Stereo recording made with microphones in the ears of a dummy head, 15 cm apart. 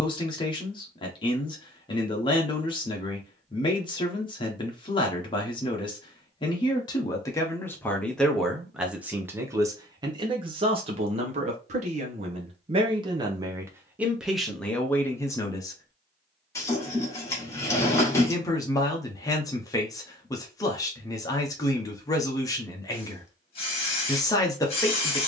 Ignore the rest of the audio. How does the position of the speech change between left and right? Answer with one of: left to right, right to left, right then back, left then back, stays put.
right then back.